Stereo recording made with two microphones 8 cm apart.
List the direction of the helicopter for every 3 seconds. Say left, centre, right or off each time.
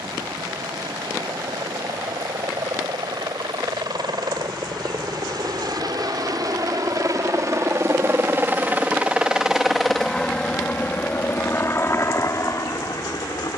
right, right, right, centre, left.